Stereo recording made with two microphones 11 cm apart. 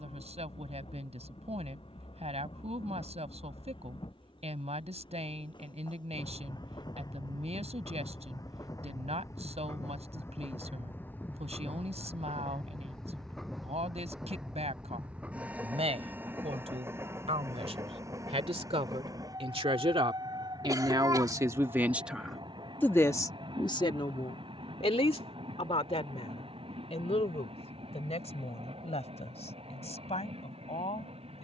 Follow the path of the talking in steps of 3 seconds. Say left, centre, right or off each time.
right, right, right, right, right, right, right, centre, left, left, left.